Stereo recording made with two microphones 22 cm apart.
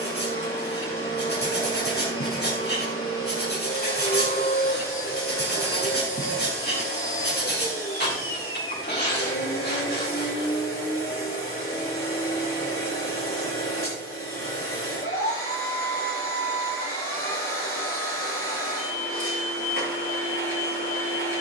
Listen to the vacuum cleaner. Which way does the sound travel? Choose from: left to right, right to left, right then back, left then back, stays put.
stays put.